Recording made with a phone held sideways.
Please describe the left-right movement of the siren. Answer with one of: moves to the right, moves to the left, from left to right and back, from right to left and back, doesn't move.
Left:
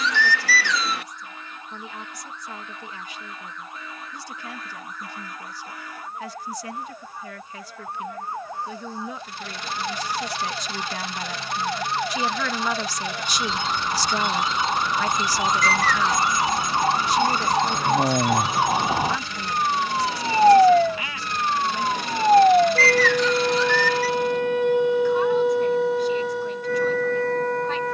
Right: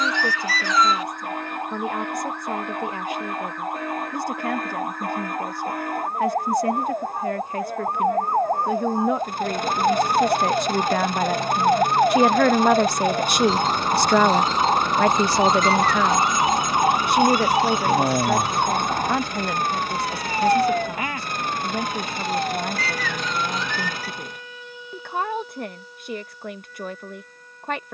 moves to the left.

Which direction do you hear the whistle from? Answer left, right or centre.
left.